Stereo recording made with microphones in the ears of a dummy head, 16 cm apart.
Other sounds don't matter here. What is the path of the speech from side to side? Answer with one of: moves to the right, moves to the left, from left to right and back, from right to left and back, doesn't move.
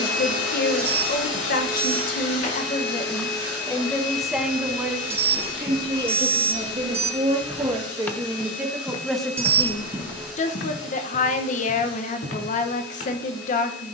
from left to right and back.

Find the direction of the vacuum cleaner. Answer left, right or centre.
left.